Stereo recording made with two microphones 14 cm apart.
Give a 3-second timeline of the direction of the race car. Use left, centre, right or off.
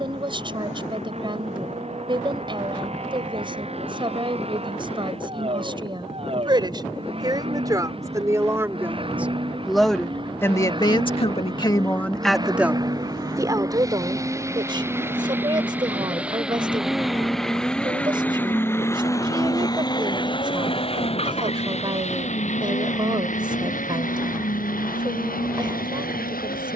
right, right, right, right, right, centre, left, left, left.